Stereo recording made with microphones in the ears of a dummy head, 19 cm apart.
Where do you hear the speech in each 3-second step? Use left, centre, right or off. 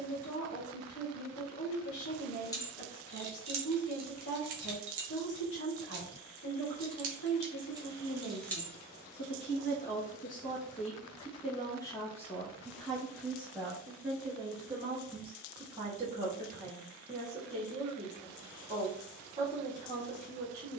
left, left, left, left, centre, right, right.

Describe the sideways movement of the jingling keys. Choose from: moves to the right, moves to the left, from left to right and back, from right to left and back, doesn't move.
from left to right and back.